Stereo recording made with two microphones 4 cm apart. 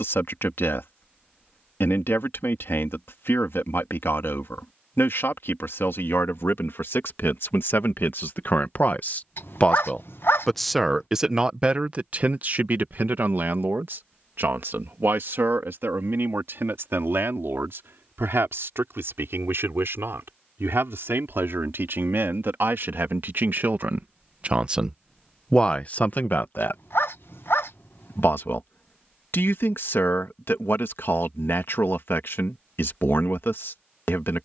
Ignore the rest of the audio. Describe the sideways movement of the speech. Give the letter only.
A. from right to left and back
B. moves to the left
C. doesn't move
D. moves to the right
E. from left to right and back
E.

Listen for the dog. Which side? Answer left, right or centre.
left.